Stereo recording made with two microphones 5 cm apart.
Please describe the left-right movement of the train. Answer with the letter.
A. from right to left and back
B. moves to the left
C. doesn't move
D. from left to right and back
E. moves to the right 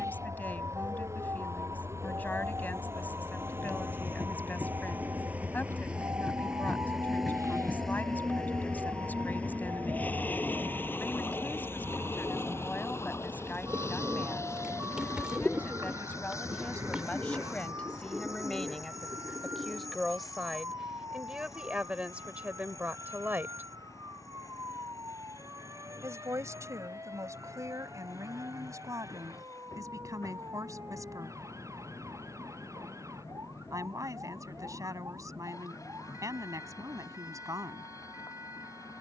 B.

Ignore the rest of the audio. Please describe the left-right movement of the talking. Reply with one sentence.
In this clip you hear the talking travel towards the right.